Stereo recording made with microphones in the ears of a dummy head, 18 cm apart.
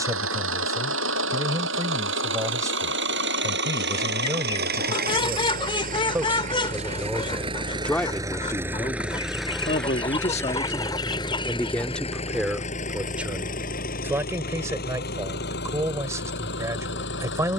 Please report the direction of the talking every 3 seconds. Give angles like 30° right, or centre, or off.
20° right, 20° right, 10° left, 20° left, 10° right, 10° right.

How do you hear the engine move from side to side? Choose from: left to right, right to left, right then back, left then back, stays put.
right to left.